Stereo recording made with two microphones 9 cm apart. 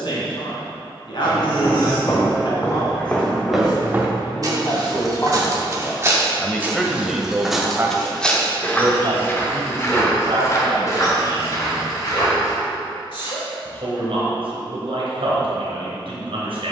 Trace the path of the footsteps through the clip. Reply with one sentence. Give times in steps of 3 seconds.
In this clip you hear the footsteps on the left from 0 s, on the right from 3 s, in the centre from 6 s, on the left from 9 s and not at all from 15 s.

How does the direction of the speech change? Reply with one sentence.
You can hear the speech move to the right.